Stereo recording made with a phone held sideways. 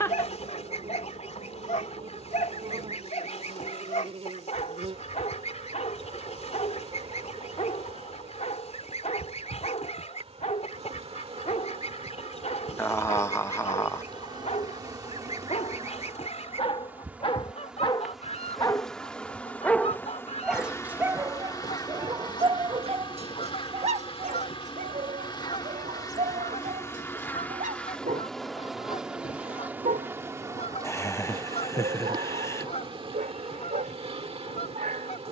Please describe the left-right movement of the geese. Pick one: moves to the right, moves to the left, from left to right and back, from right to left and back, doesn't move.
doesn't move.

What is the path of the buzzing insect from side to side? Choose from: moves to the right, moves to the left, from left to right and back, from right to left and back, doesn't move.
from right to left and back.